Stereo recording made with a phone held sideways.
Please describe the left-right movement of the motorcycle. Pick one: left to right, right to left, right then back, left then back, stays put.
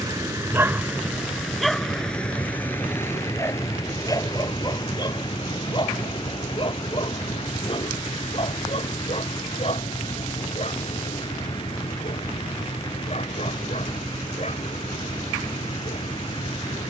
stays put.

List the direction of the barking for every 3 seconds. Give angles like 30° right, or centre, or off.
centre, 30° left, 40° left, 50° left, 50° left, 50° left.